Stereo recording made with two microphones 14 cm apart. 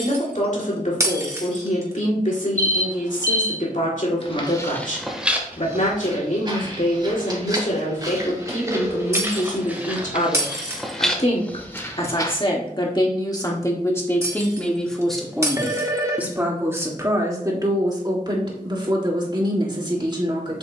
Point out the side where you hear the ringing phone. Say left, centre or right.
right.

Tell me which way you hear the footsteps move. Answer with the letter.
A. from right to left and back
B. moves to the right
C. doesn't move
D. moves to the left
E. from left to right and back
E.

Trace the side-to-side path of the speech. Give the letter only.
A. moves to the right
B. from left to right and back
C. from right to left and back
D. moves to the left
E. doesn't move
A.